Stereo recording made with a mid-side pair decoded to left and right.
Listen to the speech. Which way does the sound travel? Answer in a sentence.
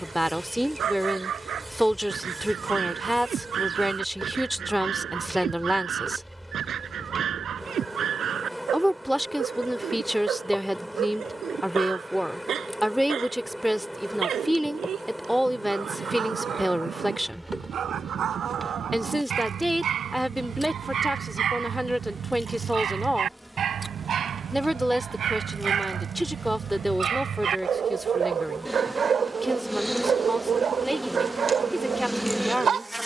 You can hear the speech stay put.